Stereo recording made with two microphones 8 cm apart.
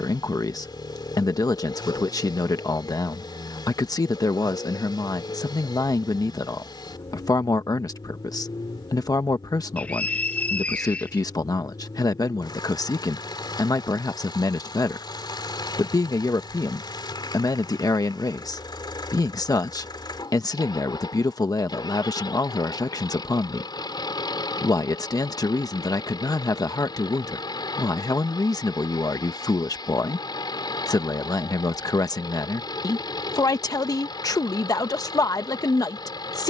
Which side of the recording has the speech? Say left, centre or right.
left.